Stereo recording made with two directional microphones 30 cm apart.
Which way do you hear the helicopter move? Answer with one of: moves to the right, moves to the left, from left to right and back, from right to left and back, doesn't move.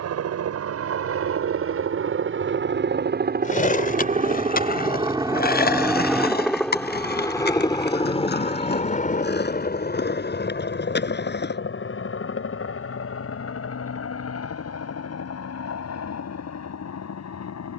moves to the left.